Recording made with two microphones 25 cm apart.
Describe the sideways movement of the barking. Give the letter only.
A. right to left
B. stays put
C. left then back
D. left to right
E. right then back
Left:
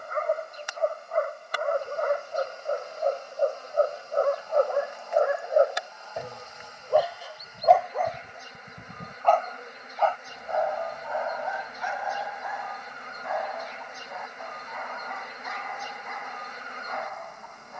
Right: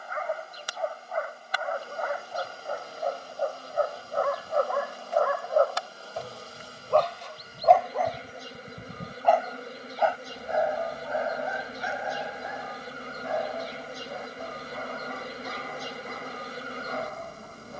D.